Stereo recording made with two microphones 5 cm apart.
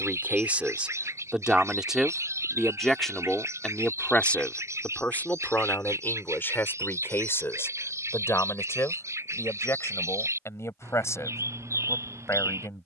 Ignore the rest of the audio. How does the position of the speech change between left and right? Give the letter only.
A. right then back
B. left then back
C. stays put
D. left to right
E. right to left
E.